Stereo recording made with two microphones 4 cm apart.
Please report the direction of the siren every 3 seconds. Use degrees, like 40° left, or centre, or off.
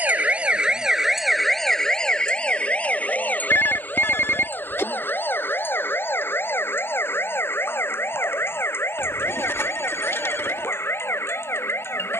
centre, 50° left, 60° left, 70° left.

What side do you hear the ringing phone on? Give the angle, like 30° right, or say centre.
70° left.